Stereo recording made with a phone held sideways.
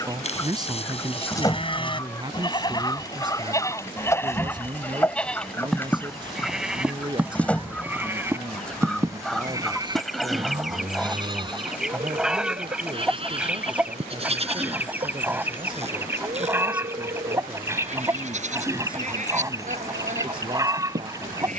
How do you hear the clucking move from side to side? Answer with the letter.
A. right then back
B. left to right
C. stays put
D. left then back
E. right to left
B.